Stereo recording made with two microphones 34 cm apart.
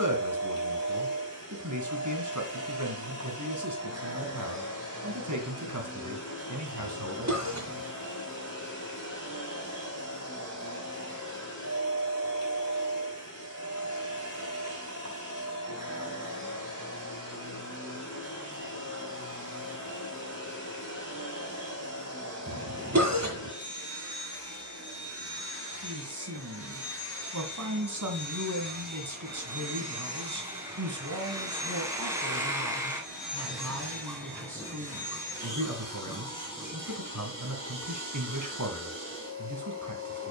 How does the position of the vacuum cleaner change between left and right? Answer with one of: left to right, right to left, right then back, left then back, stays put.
right to left.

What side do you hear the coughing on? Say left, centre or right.
right.